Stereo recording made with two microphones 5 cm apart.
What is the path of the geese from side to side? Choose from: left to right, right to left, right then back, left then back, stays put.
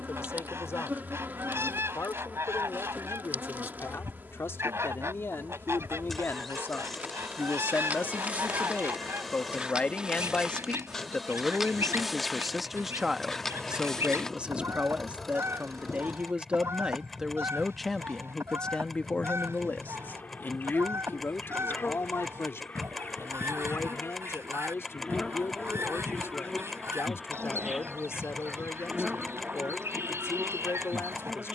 stays put.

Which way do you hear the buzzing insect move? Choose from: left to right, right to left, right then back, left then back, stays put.
left then back.